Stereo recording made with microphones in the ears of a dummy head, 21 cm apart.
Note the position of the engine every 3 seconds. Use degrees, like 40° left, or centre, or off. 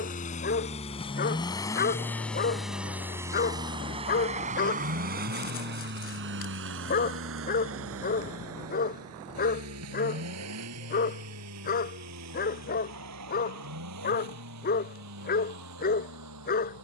20° left, 30° right, 60° right, 70° right, 80° right, 80° right.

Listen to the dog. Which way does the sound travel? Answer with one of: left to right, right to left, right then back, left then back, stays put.
stays put.